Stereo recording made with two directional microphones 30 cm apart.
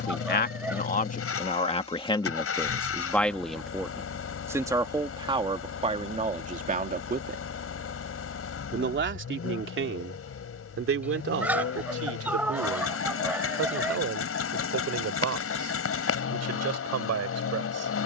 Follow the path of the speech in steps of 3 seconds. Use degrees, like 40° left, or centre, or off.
20° left, 10° right, 30° right, 40° right, 50° right, 60° right.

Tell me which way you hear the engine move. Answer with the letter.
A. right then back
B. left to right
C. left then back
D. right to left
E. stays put
E.